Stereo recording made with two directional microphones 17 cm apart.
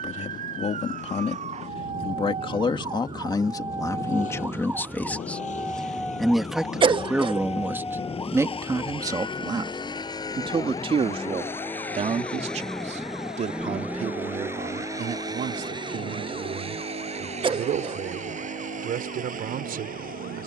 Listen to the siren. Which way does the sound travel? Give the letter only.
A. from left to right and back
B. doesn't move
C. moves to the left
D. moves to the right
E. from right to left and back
C.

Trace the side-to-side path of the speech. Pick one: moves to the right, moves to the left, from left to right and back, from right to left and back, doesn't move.
moves to the right.